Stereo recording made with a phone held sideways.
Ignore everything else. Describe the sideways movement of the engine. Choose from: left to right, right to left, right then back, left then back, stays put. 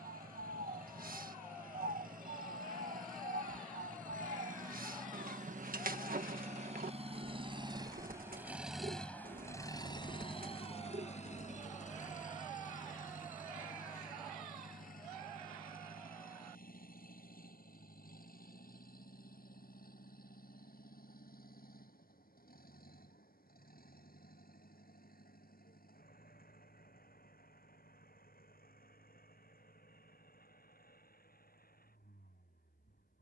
right to left.